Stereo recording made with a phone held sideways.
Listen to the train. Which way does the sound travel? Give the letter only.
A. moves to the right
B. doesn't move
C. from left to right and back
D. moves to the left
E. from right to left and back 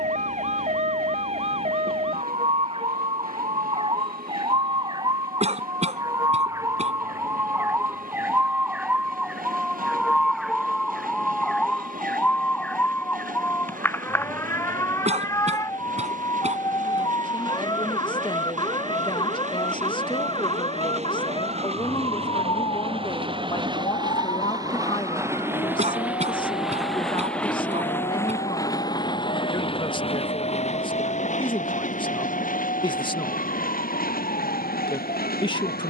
D.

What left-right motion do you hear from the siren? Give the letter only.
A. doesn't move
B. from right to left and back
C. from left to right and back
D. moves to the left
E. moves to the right
D.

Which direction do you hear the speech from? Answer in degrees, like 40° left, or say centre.
30° left.